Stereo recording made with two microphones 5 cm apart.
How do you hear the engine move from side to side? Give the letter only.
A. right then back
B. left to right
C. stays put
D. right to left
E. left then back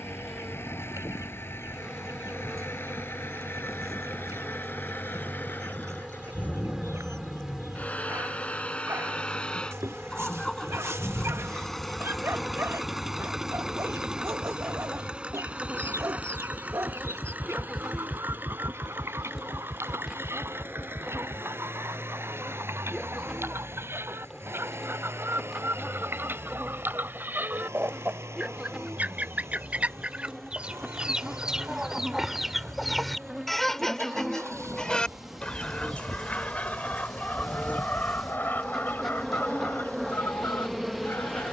B.